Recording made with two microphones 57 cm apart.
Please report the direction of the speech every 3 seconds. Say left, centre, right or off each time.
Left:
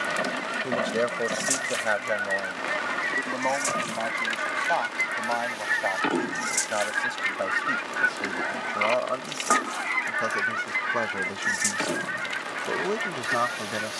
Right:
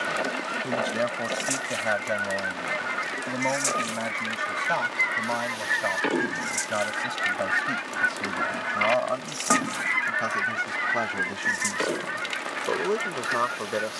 right, right, right, centre, centre.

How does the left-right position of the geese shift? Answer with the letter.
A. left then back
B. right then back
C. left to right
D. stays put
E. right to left
B.